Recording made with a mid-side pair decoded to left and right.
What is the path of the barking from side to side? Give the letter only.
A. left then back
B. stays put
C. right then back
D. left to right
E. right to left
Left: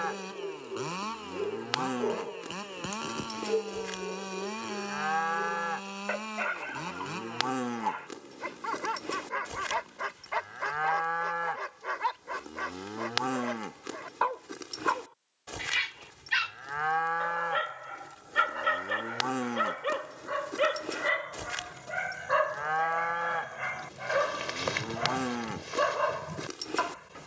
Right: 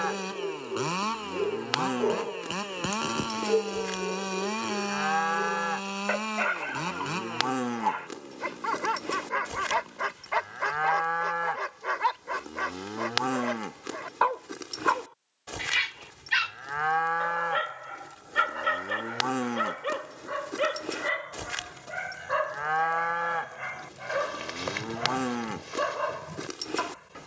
E.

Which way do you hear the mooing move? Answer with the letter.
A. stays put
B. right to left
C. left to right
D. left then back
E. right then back
A.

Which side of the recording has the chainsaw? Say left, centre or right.
right.